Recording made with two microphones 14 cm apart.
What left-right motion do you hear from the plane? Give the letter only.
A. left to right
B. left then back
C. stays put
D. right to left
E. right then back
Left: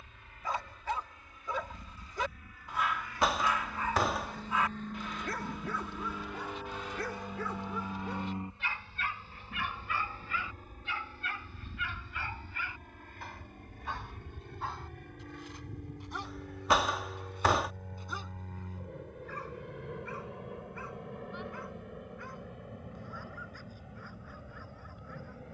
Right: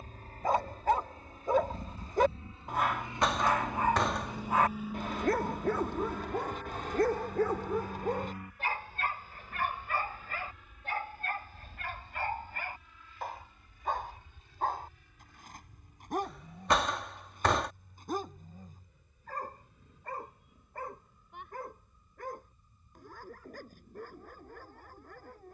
D.